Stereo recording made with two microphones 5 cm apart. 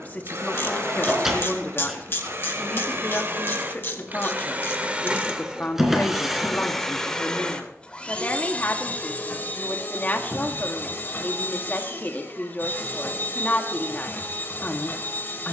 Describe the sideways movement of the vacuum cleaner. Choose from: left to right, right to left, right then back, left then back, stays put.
right to left.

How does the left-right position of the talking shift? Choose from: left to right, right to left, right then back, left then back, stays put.
stays put.